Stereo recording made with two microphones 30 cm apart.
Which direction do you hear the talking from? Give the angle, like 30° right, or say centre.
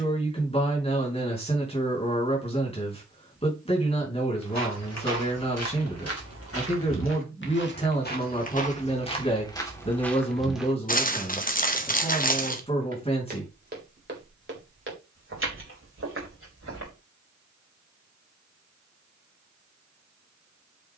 20° left.